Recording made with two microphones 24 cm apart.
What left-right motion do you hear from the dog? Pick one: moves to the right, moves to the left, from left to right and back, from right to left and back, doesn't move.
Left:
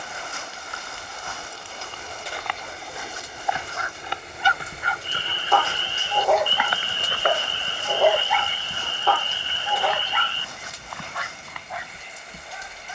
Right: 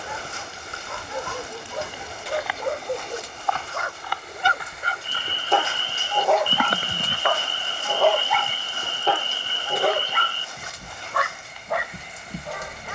from right to left and back.